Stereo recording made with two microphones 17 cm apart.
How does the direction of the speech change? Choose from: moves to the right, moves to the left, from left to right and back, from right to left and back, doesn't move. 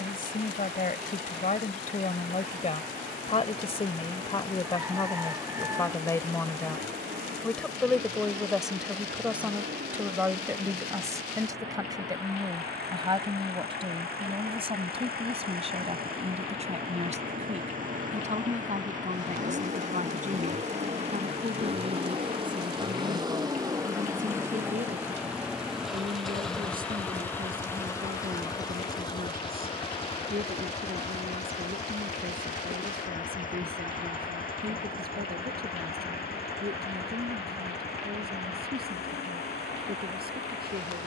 moves to the right.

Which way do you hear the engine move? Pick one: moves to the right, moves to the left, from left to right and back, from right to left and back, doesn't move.
moves to the left.